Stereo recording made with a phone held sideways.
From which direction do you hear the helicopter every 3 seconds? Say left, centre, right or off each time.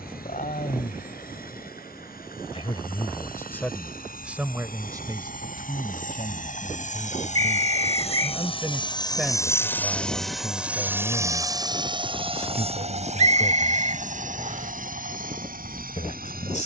left, left, left, centre, right, right.